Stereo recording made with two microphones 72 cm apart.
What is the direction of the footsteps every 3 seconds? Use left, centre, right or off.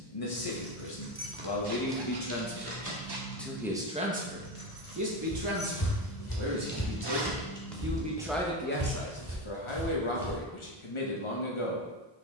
off, left, centre, right.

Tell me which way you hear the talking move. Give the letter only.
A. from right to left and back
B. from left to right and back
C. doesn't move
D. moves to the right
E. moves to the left
B.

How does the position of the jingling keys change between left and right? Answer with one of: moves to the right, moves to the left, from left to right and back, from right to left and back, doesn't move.
from right to left and back.